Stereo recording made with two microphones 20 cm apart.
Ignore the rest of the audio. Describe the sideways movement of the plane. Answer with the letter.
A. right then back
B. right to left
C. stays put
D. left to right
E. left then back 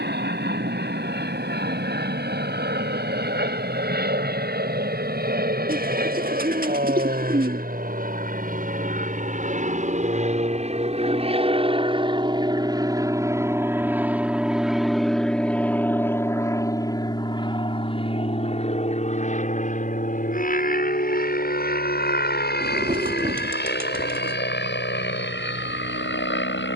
B.